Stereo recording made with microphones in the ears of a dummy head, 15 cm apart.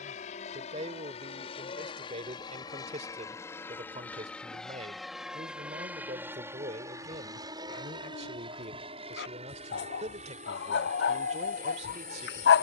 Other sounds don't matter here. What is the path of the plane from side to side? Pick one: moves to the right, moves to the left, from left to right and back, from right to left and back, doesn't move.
moves to the right.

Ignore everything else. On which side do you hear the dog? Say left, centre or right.
left.